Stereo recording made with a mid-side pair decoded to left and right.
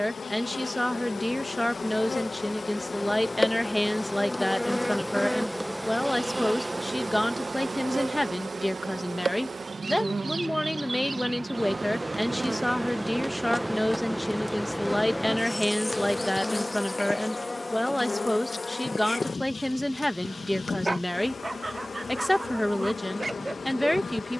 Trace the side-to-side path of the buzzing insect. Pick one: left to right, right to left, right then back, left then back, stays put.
right then back.